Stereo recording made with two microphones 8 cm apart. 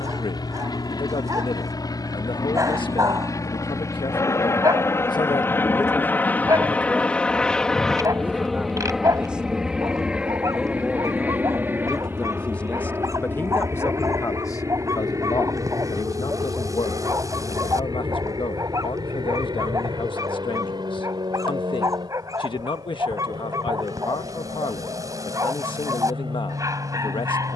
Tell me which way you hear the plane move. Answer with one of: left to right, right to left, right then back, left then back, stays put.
left to right.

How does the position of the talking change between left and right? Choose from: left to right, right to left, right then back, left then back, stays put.
right then back.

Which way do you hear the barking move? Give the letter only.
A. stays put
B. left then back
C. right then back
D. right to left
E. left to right
A.